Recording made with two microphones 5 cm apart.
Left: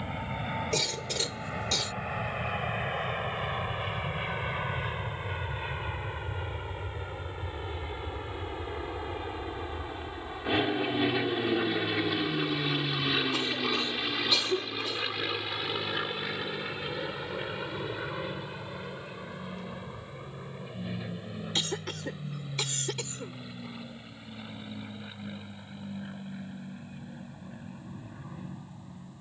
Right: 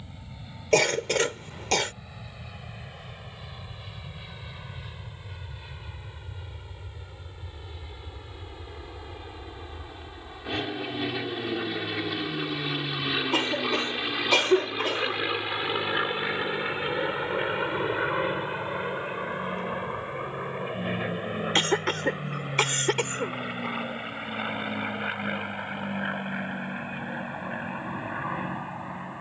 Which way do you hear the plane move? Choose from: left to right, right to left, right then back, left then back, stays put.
left to right.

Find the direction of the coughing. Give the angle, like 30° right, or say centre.
60° right.